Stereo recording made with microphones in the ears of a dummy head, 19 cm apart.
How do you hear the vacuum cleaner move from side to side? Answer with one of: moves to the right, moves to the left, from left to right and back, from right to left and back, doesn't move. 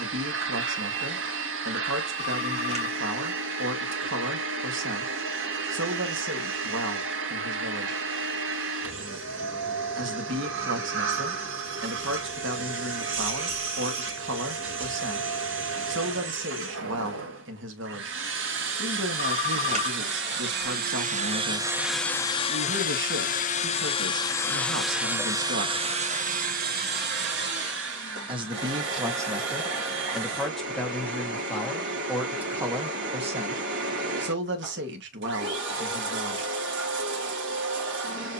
from right to left and back.